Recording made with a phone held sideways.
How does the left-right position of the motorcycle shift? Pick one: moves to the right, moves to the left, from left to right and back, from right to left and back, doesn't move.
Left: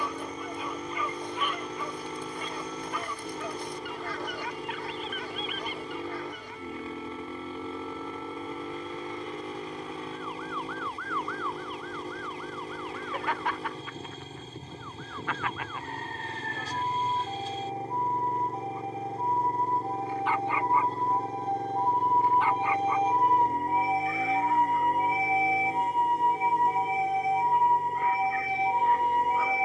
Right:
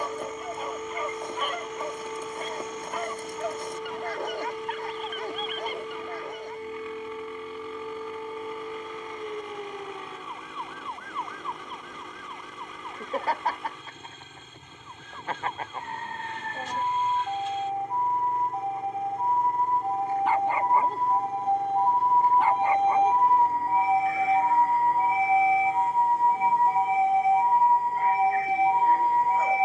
doesn't move.